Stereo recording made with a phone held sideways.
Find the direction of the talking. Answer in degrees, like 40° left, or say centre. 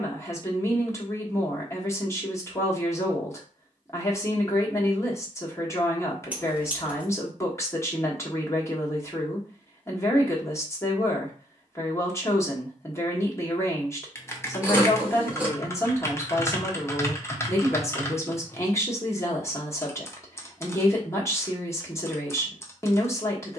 20° left.